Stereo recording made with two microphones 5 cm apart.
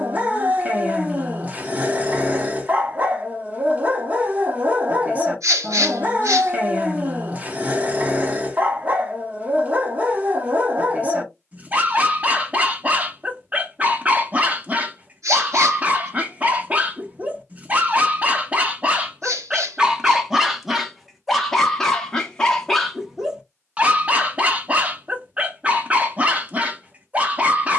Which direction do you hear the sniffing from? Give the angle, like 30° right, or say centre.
80° right.